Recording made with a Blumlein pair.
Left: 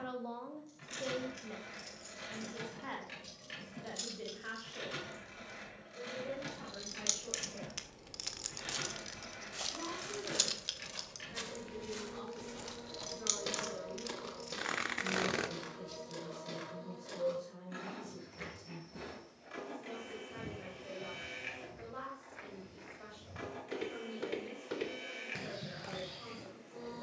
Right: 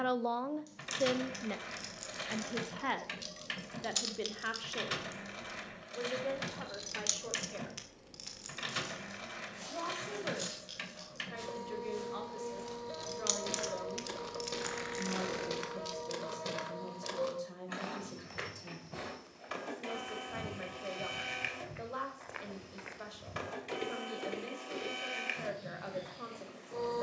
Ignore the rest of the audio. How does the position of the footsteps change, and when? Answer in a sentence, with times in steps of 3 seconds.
You can hear the footsteps not at all from 0 s, on the left from 9 s, in the centre from 12 s, on the right from 15 s and on the left from 24 s.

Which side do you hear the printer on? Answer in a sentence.
In this clip you hear the printer on the right.